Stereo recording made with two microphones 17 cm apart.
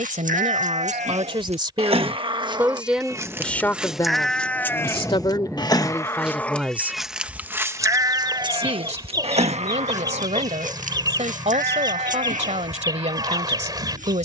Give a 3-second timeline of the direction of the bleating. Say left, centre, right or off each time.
right, centre, centre, right, right.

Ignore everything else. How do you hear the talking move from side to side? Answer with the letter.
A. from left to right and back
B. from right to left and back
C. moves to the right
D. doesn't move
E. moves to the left
B.